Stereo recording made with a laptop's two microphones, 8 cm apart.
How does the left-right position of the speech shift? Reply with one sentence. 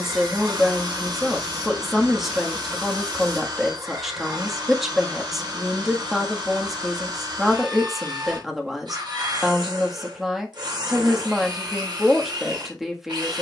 In this clip you hear the speech stay put.